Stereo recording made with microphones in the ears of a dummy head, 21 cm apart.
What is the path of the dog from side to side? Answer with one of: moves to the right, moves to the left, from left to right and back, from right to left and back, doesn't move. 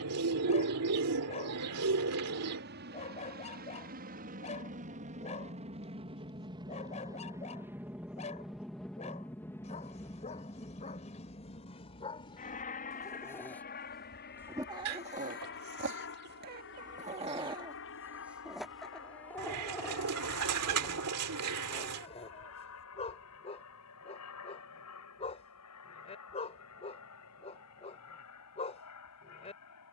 from left to right and back.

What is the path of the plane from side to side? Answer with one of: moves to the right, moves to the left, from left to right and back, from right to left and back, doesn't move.
moves to the left.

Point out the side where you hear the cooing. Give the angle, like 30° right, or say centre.
80° right.